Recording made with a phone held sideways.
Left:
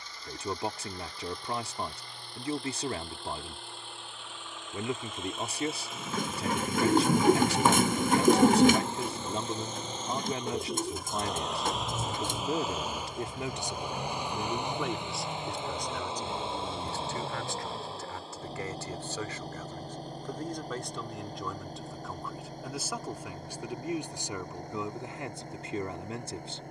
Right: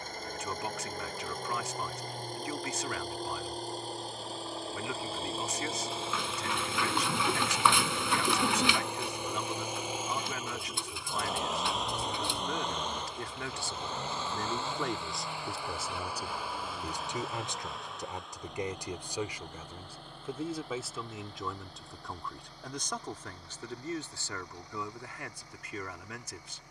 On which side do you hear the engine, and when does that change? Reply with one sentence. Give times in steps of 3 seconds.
You can hear the engine on the right from 0 s, in the centre from 9 s and on the left from 15 s.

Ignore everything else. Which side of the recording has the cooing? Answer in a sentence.
You can hear the cooing on the left.